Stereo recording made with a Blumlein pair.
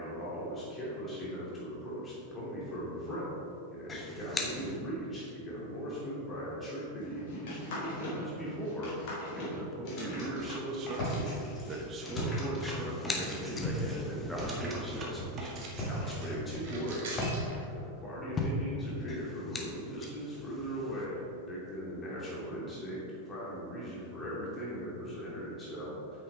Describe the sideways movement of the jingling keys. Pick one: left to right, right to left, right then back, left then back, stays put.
left to right.